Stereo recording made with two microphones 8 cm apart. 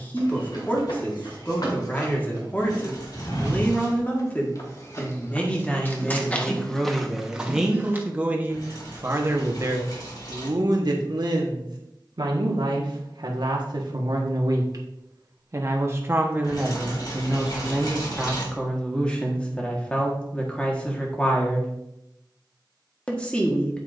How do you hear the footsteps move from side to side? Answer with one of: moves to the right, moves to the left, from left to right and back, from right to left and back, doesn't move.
moves to the right.